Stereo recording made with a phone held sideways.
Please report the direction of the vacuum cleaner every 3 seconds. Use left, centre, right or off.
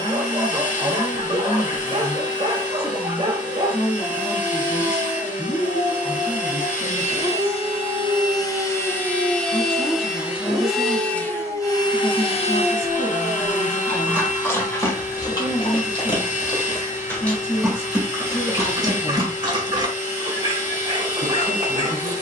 left, left, left, centre, left, left, left, left.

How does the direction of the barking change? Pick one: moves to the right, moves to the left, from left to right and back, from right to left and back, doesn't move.
from right to left and back.